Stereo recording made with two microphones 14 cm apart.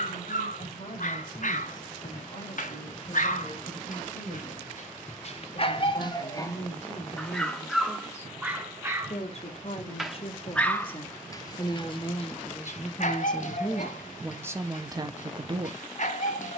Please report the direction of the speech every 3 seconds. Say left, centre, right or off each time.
left, left, left, left, centre, right.